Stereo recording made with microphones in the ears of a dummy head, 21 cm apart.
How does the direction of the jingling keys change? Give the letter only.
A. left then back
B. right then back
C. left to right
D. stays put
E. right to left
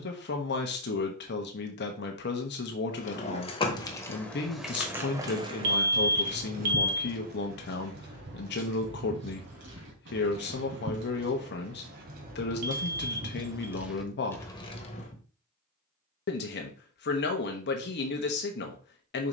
B.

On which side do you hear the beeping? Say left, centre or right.
right.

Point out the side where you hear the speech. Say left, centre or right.
left.